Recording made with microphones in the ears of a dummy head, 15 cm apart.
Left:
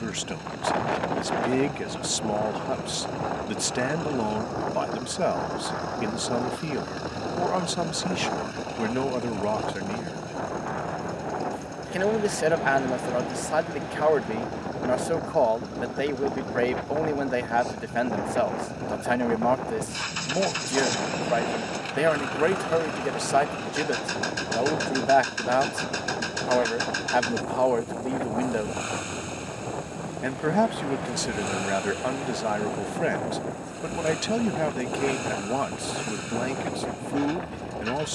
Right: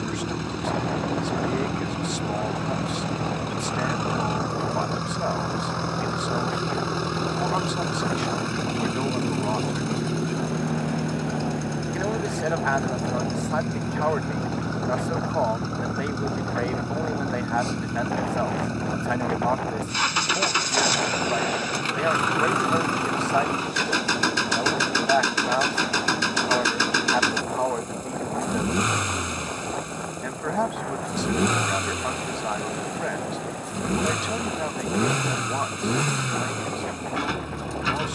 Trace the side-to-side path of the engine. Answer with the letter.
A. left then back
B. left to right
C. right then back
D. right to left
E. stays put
E.